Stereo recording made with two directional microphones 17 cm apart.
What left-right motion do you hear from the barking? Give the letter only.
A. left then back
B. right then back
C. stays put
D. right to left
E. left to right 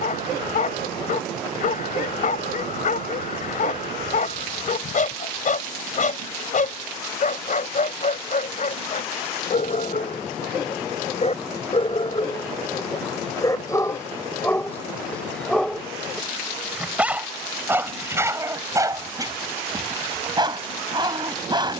E.